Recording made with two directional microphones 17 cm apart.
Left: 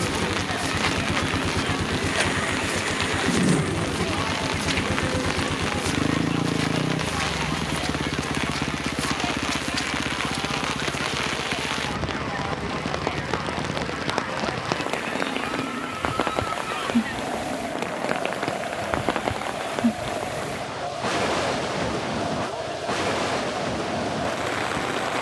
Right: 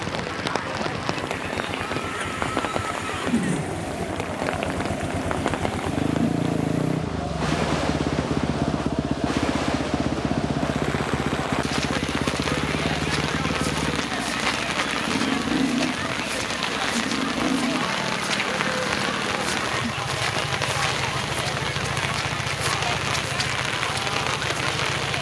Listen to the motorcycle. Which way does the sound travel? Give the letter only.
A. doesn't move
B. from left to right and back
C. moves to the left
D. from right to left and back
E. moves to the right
E.